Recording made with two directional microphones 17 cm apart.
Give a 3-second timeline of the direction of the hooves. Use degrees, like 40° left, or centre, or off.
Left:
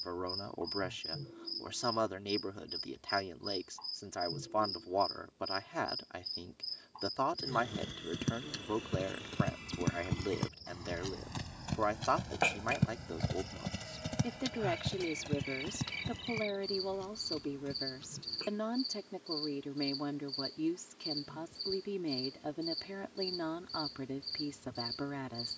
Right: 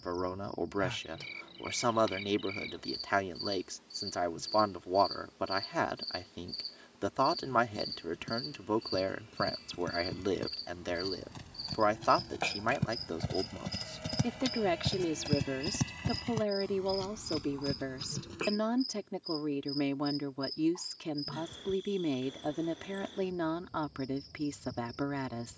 off, off, 60° left, 50° left, centre, 40° right, 60° right, off, off.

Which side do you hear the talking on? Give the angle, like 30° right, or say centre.
30° right.